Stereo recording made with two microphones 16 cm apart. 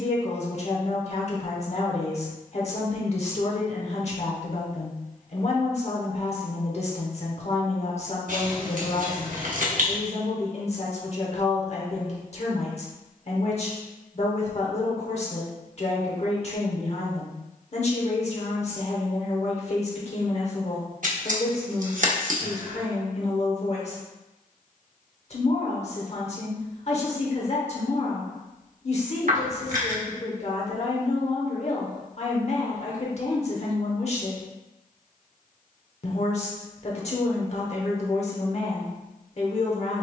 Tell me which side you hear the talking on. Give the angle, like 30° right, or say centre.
50° left.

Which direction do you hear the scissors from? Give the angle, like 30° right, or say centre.
60° right.